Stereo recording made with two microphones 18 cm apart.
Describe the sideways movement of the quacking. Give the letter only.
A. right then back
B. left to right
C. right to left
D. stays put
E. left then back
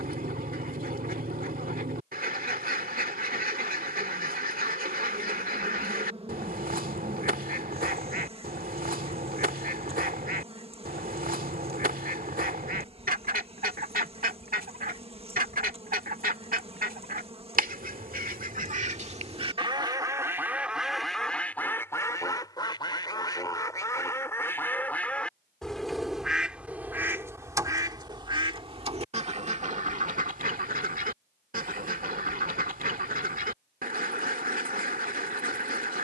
E.